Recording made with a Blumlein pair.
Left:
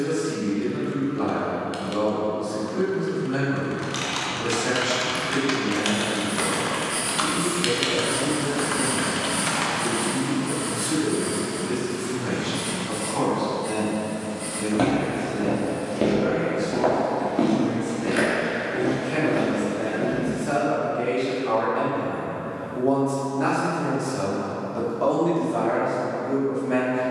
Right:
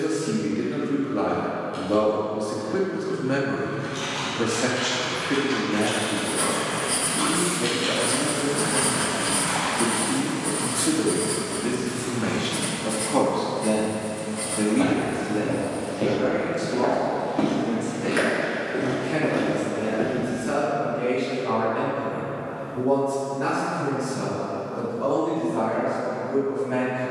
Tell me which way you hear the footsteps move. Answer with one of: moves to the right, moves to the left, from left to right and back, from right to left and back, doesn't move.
moves to the right.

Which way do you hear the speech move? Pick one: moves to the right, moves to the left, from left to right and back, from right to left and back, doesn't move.
moves to the left.